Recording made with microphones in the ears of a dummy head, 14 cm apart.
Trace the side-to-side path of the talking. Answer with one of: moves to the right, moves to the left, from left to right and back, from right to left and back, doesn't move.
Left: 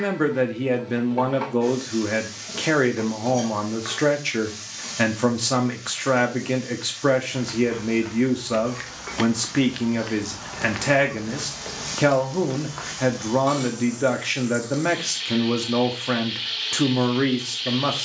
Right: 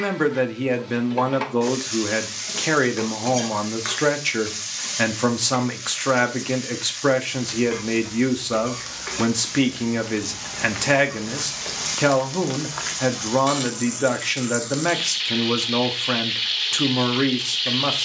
doesn't move.